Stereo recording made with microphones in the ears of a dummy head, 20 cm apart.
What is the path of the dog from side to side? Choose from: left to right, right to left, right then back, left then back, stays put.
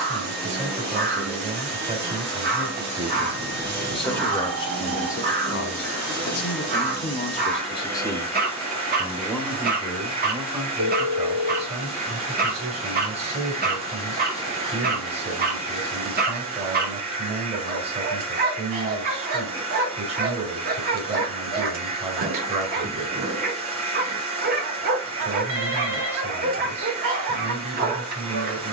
stays put.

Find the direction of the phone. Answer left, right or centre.
right.